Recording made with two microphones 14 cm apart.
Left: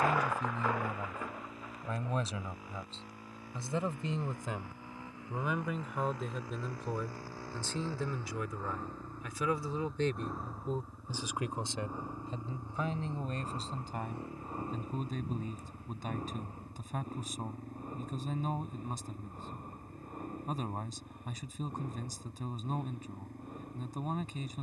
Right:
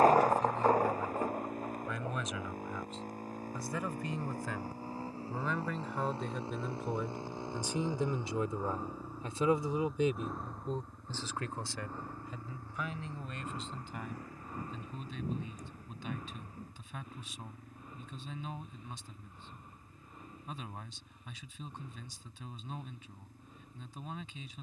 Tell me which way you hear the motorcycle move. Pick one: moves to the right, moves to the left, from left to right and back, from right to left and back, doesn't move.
moves to the left.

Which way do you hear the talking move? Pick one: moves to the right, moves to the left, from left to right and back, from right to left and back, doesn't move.
from left to right and back.